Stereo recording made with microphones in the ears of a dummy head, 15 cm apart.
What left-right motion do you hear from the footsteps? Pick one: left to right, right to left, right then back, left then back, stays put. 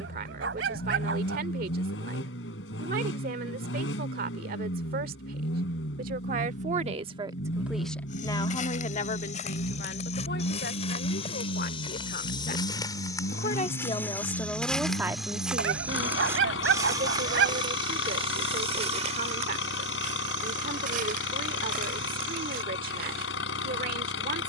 left to right.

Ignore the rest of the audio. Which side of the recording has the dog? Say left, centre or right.
right.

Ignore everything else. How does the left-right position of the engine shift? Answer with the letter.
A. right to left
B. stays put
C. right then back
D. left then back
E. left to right
B.